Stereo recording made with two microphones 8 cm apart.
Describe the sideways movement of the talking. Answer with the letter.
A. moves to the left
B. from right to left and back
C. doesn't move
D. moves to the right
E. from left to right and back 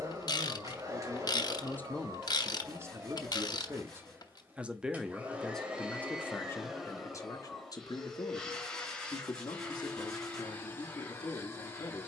E.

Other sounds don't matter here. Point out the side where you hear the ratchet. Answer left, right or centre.
left.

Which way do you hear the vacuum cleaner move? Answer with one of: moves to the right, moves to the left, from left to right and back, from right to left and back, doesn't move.
moves to the left.